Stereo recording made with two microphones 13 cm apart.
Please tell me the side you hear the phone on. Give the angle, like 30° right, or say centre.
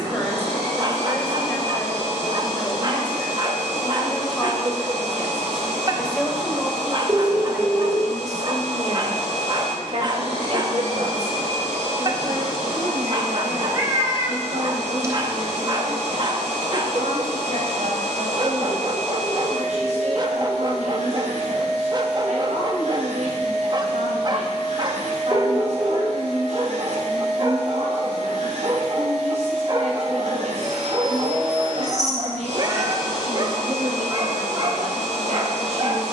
30° right.